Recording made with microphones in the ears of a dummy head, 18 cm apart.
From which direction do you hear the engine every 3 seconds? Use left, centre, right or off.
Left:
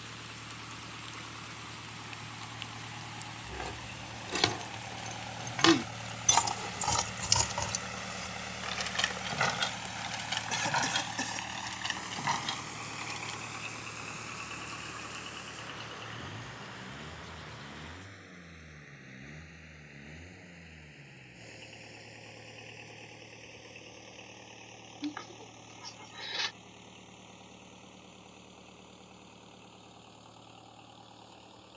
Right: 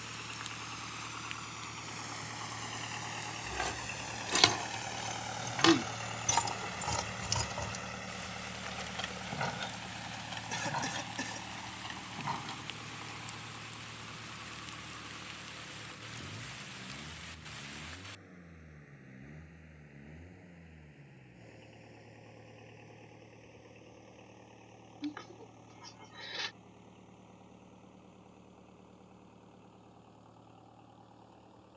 right, right, centre, left, left, left, left, left, left, left, left.